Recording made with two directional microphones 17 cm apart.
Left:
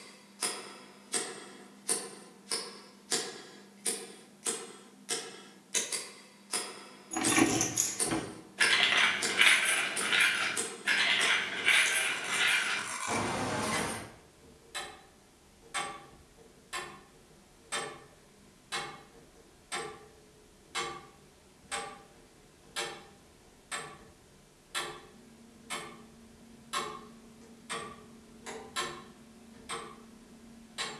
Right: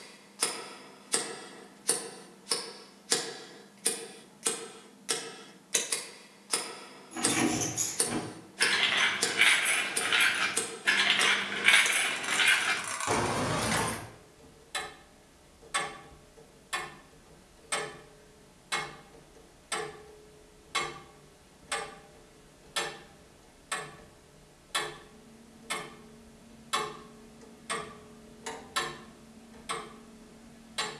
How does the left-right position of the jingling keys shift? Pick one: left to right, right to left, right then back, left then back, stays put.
left to right.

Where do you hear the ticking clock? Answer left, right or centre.
right.